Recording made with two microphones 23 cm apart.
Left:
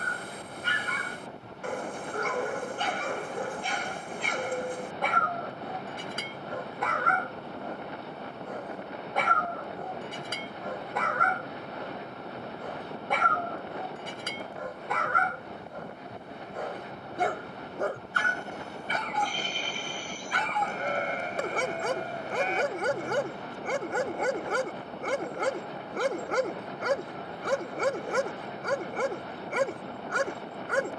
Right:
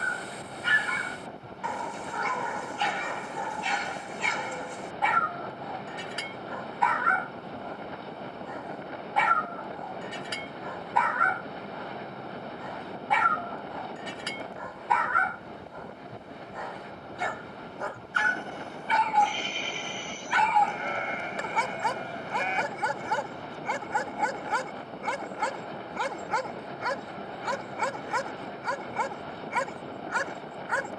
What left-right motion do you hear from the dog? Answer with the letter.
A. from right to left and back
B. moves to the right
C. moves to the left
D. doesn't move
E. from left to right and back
D.